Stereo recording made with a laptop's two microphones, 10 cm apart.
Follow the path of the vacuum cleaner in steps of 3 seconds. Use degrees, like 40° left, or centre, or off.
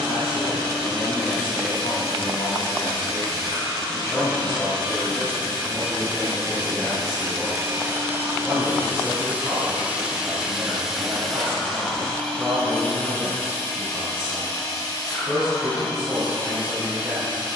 60° right, 50° right, 40° right, 10° right, 30° left, 50° left.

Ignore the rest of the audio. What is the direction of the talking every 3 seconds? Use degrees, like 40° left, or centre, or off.
60° left, 30° left, centre, 20° right, 20° right, 30° right.